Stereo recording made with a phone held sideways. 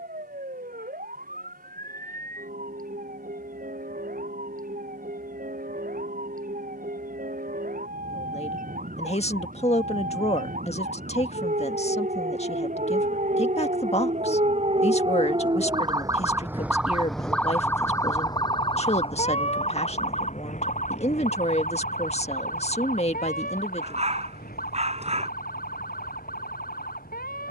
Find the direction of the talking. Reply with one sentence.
In this clip you hear the talking on the left.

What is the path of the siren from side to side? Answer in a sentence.
You can hear the siren travel towards the left.